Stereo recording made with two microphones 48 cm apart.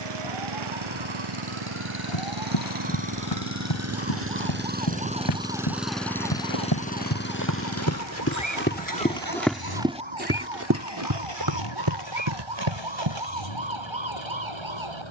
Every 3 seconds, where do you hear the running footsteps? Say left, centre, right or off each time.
off, left, left, right, right.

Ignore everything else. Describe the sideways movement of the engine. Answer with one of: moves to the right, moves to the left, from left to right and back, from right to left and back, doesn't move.
moves to the left.